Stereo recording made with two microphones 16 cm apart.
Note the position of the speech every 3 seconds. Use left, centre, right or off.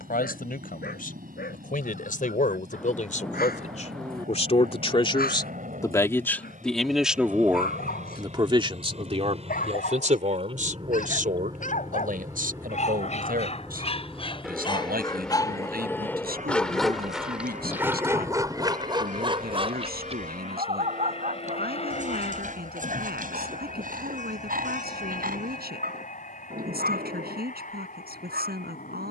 left, left, centre, right, right, right, right, right, right, right.